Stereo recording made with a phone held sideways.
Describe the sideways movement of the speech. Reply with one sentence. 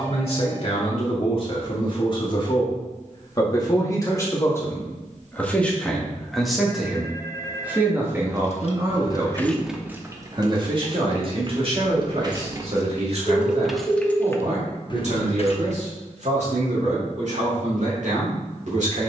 In this clip you hear the speech move to the right.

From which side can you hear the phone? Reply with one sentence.
In this clip you hear the phone on the left.